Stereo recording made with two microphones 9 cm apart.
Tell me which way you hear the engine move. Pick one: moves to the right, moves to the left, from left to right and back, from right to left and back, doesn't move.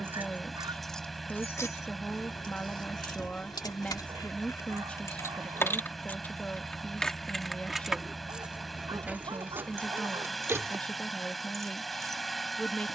doesn't move.